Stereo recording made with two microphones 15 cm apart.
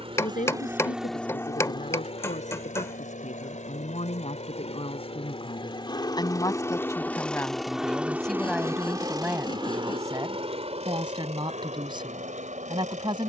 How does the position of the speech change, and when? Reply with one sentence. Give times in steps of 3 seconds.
In this clip you hear the speech on the left from 0 s, in the centre from 6 s and on the right from 9 s.